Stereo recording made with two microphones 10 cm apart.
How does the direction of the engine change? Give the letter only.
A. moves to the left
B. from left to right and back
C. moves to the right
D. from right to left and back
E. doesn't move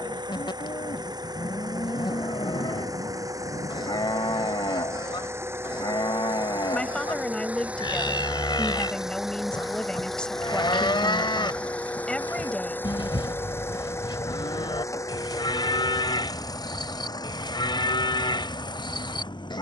A.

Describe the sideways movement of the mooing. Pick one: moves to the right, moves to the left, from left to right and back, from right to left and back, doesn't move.
doesn't move.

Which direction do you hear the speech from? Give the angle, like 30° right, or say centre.
10° left.